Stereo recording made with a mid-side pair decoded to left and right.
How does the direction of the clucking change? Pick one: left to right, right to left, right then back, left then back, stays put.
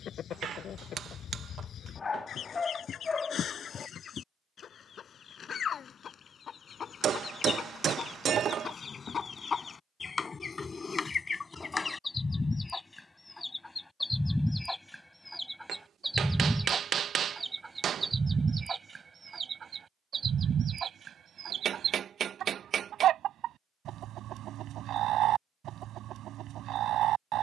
left to right.